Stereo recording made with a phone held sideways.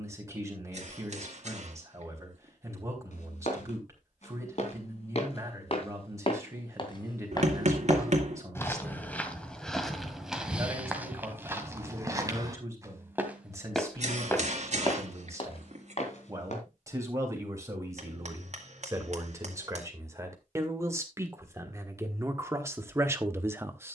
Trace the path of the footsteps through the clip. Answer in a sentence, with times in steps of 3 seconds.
In this clip you hear the footsteps not at all from 0 s, on the left from 3 s, in the centre from 9 s, on the left from 15 s and not at all from 18 s.